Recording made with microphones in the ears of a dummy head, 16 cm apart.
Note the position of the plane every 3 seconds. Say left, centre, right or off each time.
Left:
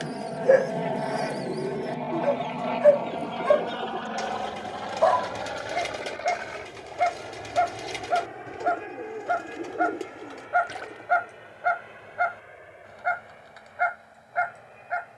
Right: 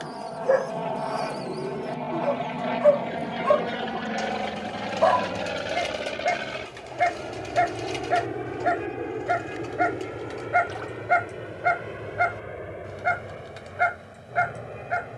centre, right, right, right, right.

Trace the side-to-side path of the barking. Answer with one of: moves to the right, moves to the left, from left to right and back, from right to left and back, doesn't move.
moves to the right.